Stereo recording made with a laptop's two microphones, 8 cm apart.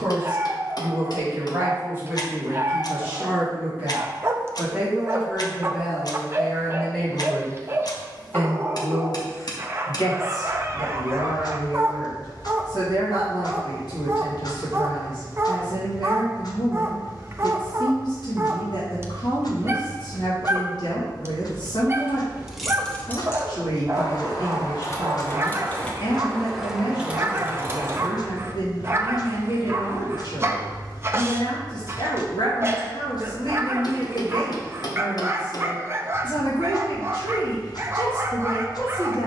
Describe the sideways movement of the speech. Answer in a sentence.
You can hear the speech move from right to left.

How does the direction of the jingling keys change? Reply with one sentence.
In this clip you hear the jingling keys go left and come back.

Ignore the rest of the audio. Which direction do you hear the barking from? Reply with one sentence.
In this clip you hear the barking on the right.